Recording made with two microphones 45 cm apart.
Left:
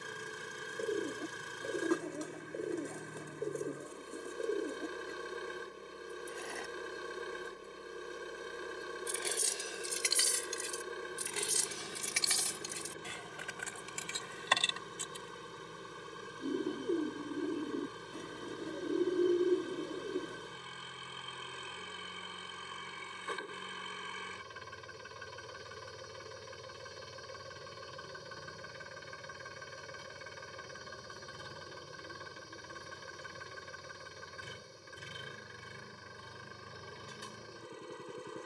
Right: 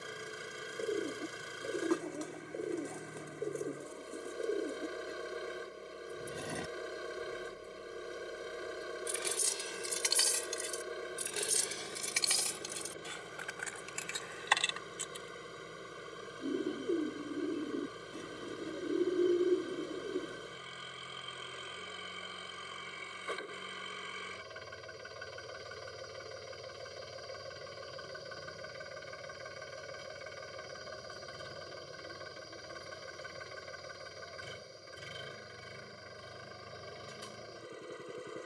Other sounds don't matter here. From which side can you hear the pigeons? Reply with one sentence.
In this clip you hear the pigeons in the centre.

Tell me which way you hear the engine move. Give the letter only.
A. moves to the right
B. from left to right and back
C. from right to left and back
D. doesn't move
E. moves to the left
D.